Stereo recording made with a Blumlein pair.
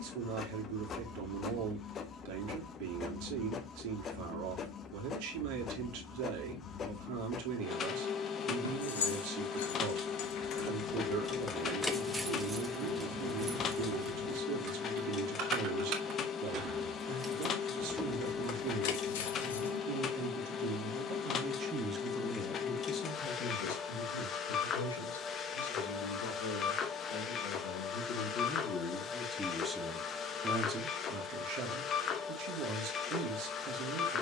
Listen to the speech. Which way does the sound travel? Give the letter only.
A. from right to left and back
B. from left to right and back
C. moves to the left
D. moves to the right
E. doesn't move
A.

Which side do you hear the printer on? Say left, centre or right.
left.